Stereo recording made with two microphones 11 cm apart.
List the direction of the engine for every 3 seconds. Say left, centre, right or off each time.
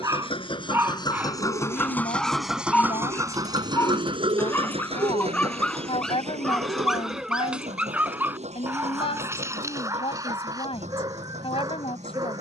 left, right, right, right.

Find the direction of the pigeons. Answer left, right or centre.
right.